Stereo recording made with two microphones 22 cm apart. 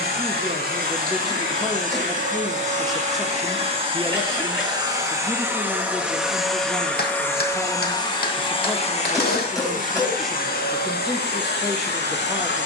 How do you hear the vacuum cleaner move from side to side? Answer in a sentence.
In this clip you hear the vacuum cleaner travel towards the left.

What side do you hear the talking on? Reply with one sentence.
You can hear the talking in the centre.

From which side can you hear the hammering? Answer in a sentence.
In this clip you hear the hammering on the left.